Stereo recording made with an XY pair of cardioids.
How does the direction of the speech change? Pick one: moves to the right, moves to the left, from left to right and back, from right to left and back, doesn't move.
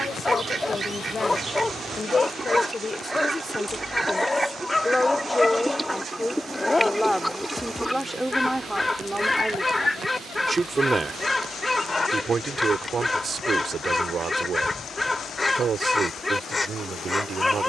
moves to the right.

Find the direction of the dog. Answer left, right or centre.
centre.